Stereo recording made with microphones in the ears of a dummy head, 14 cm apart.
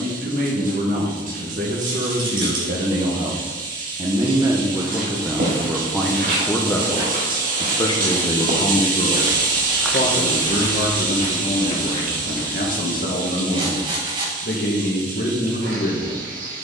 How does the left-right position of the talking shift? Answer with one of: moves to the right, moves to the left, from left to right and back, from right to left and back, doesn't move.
moves to the left.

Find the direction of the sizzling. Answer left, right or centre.
right.